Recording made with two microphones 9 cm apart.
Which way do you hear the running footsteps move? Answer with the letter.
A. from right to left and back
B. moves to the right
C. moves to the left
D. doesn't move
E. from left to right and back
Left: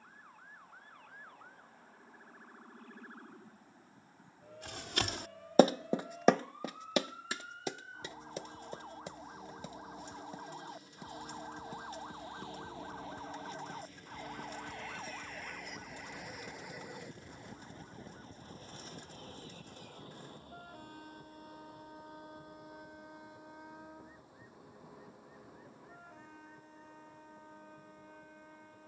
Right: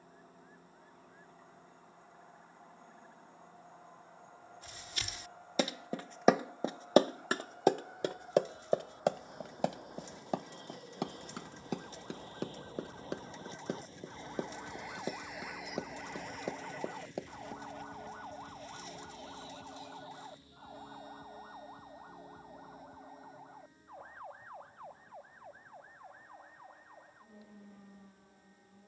B.